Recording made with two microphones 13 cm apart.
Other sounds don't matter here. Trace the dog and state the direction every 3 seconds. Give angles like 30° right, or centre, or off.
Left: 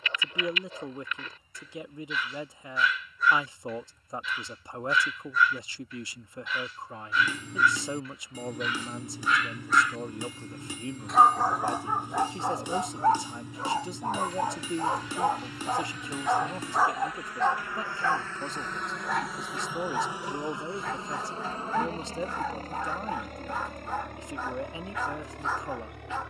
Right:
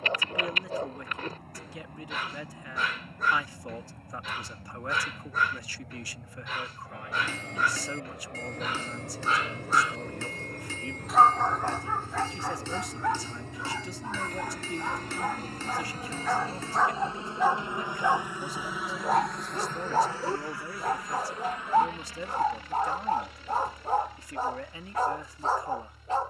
50° right, 50° right, 50° right, 10° right, 30° left, 10° left, 30° right, 40° right, 40° right.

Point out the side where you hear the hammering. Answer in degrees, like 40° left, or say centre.
10° left.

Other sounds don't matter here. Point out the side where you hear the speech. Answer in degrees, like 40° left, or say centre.
20° left.